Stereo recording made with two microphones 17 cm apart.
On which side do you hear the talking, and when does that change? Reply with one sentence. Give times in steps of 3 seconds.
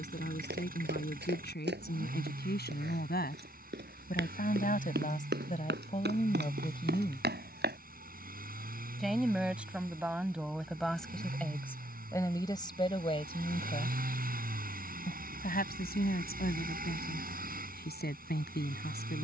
In this clip you hear the talking on the left from 0 s, in the centre from 9 s and on the left from 12 s.